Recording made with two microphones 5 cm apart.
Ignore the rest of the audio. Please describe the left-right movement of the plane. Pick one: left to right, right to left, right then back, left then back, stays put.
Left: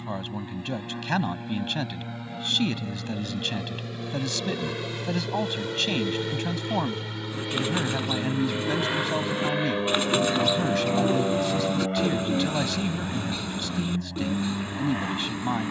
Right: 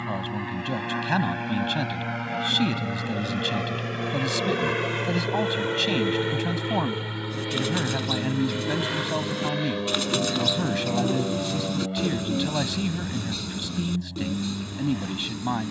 right to left.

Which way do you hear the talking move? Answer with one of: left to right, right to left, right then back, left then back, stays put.
stays put.